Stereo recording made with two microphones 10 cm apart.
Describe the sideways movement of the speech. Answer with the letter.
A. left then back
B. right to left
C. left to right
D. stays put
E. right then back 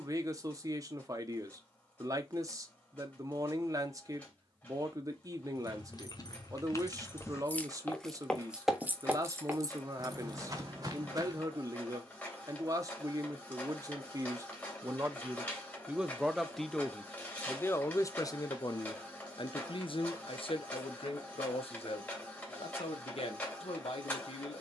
B.